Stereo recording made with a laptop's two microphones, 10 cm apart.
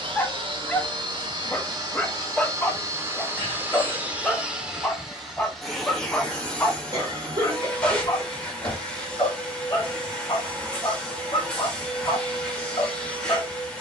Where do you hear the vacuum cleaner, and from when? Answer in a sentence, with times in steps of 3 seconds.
In this clip you hear the vacuum cleaner on the right from 0 s and in the centre from 3 s.